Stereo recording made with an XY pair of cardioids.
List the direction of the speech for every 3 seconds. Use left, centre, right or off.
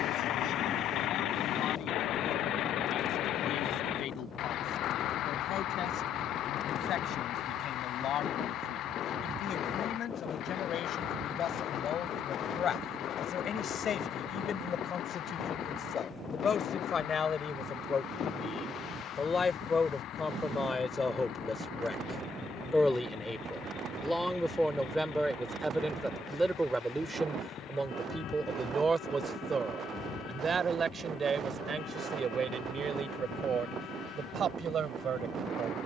left, left, left, left, left, left, left, centre, centre, right, right, right.